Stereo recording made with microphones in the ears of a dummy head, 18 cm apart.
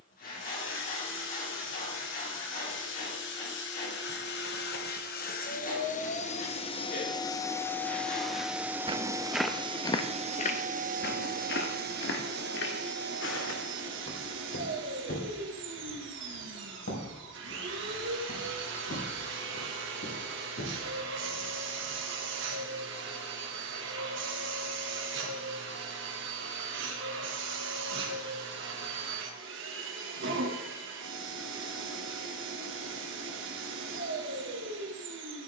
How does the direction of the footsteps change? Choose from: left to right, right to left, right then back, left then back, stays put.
right to left.